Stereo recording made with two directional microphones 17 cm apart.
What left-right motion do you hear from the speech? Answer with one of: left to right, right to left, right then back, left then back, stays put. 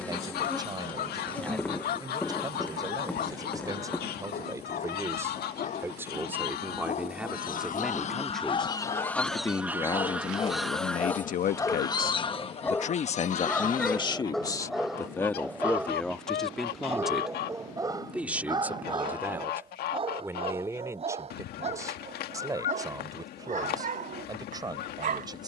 left then back.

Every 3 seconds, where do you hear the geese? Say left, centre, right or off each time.
left, left, left, centre, left, left, left, left, left.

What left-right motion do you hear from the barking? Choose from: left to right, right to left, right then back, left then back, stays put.
left to right.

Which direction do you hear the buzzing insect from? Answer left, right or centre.
centre.